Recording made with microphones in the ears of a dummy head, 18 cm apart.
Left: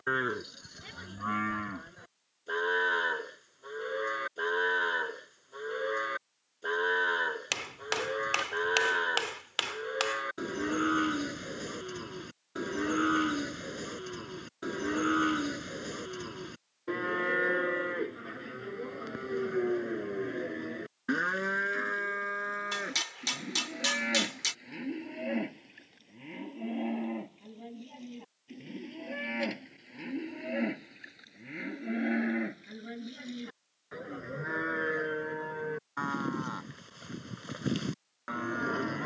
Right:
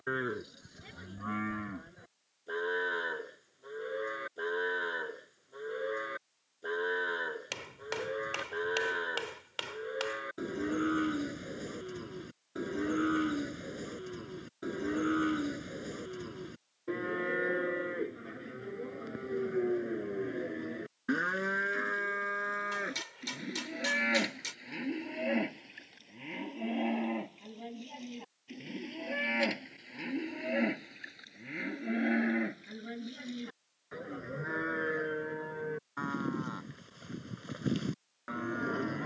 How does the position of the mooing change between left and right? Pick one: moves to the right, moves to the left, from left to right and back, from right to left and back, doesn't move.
from left to right and back.